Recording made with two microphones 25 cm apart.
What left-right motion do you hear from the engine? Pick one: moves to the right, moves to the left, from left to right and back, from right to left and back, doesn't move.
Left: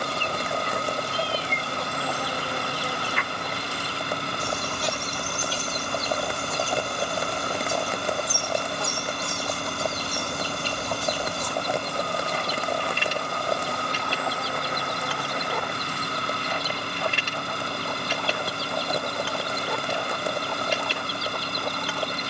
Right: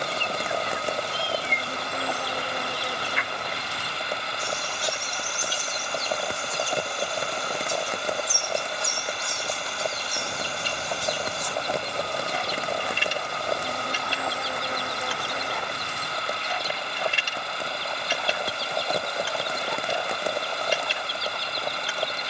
doesn't move.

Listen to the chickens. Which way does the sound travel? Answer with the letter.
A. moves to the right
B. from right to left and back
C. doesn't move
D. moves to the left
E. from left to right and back
C.